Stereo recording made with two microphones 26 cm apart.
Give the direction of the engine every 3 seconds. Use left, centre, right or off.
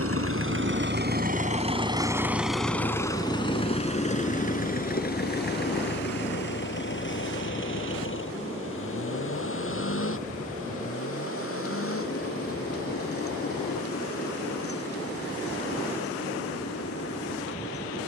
right, left, left, left, left, left.